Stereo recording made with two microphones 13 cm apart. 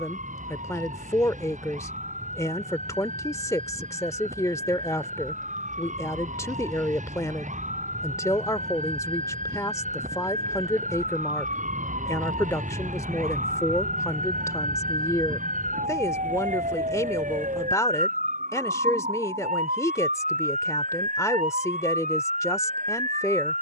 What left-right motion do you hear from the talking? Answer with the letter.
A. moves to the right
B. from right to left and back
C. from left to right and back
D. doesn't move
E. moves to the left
D.